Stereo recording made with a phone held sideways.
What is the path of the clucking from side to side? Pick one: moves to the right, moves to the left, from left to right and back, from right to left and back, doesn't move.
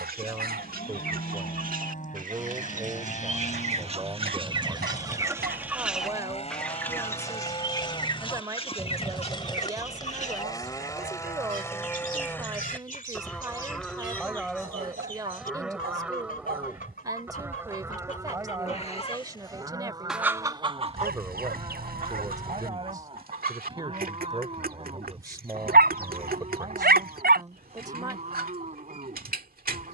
from right to left and back.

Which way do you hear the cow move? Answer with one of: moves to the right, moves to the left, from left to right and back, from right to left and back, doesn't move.
moves to the right.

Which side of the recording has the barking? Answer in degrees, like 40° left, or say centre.
90° right.